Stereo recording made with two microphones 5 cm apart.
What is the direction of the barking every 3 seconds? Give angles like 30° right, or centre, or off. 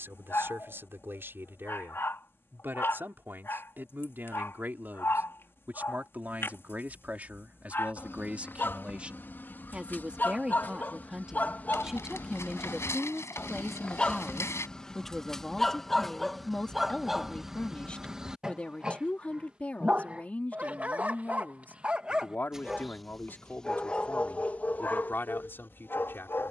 50° left, 50° left, 50° left, 40° left, 20° left, centre, 20° right, 10° right, 40° left.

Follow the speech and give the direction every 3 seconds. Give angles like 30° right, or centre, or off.
50° right, 40° right, 30° right, 20° right, centre, 20° left, 30° left, 40° left, 50° left.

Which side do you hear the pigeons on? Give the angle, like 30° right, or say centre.
70° left.